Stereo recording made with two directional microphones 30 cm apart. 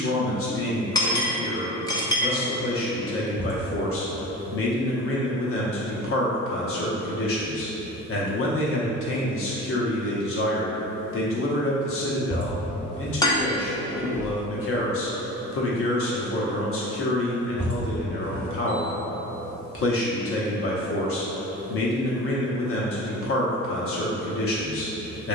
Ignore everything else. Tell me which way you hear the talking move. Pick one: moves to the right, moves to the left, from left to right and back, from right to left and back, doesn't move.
doesn't move.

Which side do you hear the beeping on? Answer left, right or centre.
centre.